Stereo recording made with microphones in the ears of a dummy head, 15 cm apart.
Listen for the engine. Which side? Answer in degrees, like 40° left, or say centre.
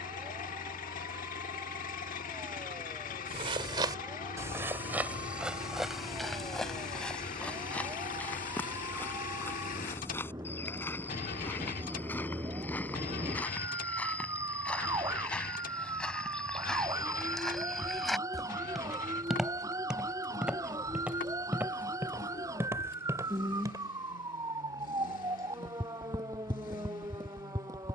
50° left.